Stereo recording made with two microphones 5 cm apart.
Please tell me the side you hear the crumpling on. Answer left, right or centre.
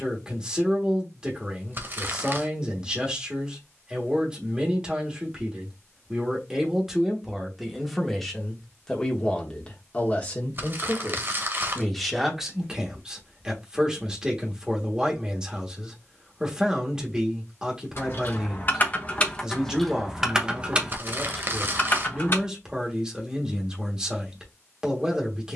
right.